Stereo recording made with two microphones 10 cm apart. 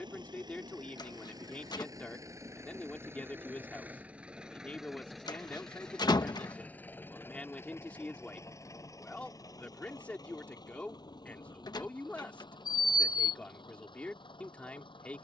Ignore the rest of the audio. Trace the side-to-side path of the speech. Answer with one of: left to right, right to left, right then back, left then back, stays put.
stays put.